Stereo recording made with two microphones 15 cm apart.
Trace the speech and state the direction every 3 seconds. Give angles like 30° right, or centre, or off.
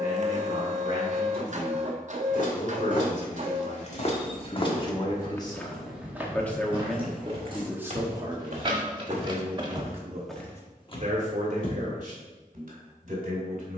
60° left, 40° left, 10° right, 50° right, 60° right.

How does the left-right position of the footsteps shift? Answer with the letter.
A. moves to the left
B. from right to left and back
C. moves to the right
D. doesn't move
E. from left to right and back
E.